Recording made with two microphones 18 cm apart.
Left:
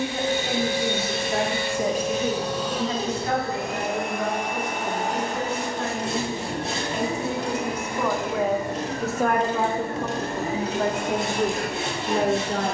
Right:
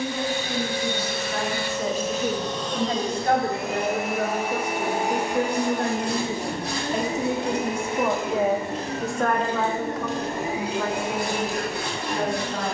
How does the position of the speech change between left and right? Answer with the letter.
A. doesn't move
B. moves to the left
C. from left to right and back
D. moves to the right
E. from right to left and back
C.